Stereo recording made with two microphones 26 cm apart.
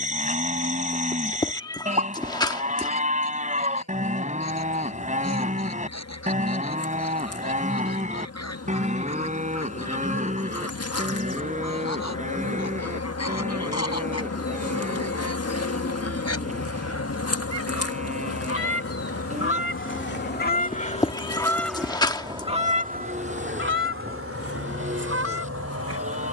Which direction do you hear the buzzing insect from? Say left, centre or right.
left.